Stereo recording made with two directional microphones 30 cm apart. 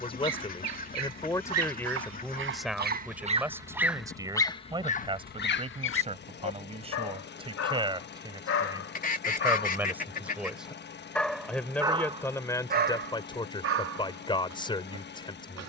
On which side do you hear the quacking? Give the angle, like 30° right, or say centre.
30° left.